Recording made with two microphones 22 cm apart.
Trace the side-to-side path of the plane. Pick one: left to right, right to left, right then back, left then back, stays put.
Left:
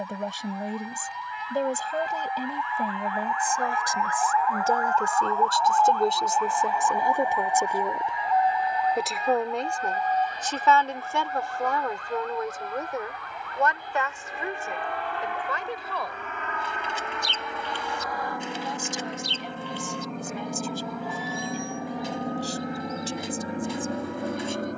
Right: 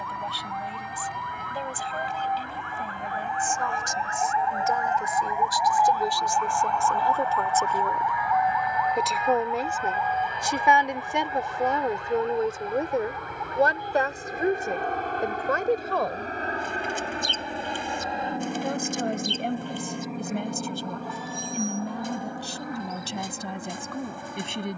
right to left.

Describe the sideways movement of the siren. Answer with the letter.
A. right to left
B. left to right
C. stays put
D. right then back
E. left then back
A.